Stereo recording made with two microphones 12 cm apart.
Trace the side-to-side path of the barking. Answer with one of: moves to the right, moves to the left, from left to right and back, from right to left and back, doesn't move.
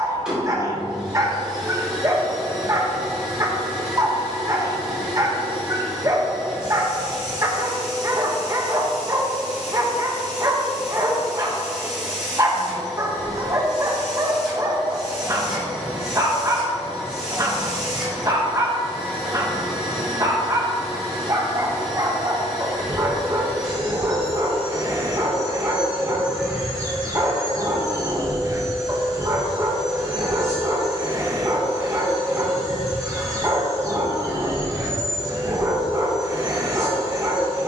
doesn't move.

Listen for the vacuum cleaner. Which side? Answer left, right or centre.
centre.